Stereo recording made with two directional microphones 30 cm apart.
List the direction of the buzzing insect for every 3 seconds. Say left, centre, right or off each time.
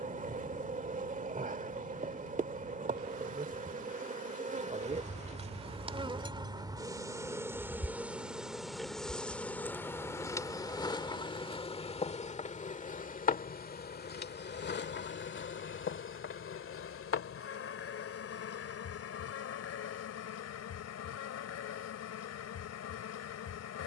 right, right, centre, centre, left, left, left, left.